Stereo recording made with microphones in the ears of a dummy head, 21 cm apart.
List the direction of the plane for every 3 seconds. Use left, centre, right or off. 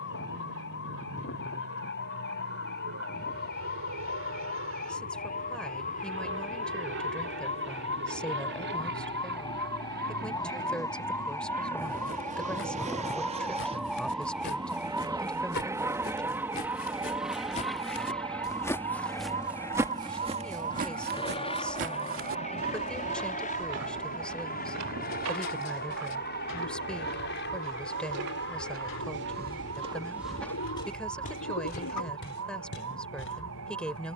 right, right, right, right, right, centre, centre, left, left, left, left, left.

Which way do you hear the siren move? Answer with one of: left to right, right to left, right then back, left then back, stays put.
left to right.